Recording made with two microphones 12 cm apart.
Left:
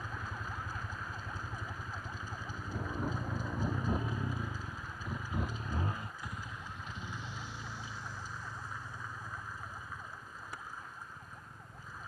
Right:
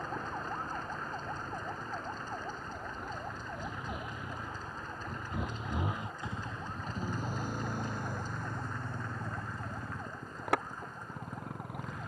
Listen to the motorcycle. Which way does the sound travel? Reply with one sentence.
In this clip you hear the motorcycle travel towards the right.